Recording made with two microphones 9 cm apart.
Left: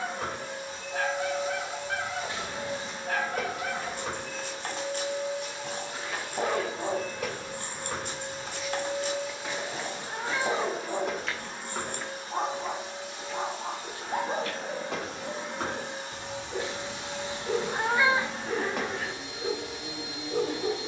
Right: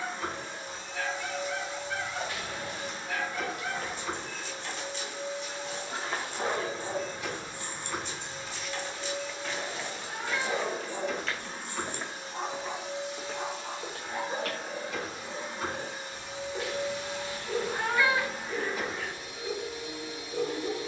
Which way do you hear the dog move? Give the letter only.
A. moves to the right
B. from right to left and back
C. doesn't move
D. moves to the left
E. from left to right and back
C.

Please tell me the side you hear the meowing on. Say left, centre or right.
left.